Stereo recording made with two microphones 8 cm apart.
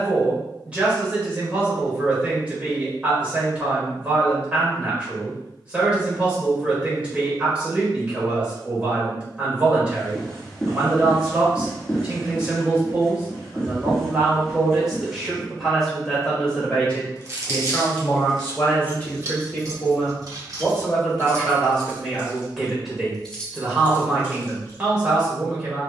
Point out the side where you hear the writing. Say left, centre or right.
centre.